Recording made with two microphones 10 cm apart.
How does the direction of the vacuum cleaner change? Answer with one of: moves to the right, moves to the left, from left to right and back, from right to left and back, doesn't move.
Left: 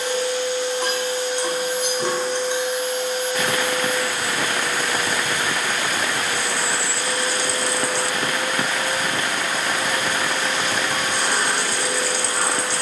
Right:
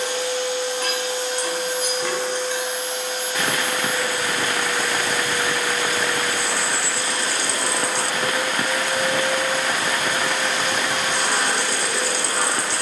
doesn't move.